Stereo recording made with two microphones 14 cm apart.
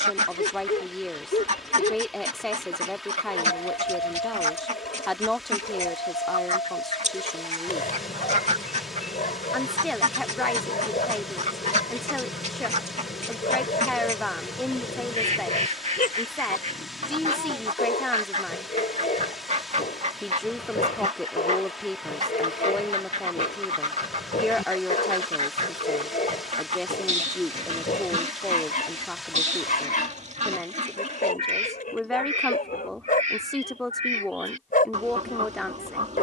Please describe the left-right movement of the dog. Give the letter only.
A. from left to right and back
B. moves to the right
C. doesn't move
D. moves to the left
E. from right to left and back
C.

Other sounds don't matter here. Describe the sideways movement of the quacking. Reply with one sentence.
You can hear the quacking stay put.